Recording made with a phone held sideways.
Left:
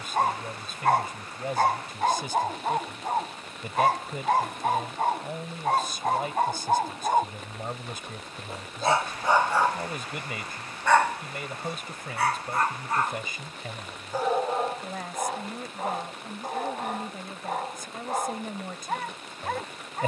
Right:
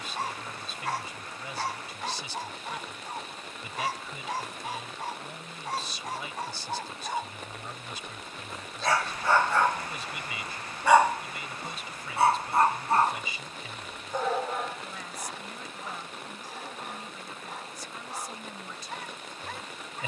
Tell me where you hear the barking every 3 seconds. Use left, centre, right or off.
left, left, left, centre, centre, left, left.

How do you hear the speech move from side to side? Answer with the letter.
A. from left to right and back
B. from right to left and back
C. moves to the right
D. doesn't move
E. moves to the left
D.